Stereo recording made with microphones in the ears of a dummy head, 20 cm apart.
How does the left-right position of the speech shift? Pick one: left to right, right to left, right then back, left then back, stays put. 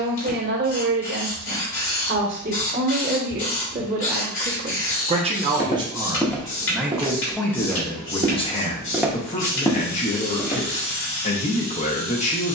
right to left.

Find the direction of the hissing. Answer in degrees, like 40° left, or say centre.
60° left.